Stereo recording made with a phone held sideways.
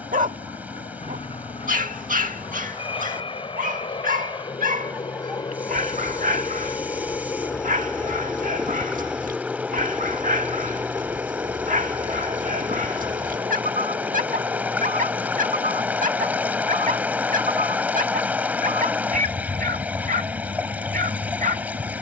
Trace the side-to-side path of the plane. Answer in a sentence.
You can hear the plane move to the right.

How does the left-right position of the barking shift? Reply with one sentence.
You can hear the barking stay put.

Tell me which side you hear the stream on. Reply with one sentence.
In this clip you hear the stream in the centre.